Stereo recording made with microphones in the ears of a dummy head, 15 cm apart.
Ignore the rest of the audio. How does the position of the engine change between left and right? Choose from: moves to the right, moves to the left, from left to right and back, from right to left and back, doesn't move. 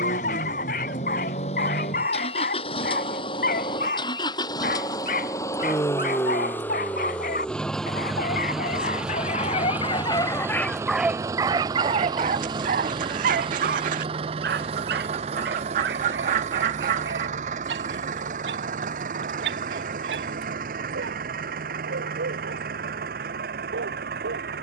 moves to the right.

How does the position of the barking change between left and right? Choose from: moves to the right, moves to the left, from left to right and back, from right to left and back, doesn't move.
moves to the right.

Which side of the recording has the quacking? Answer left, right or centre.
right.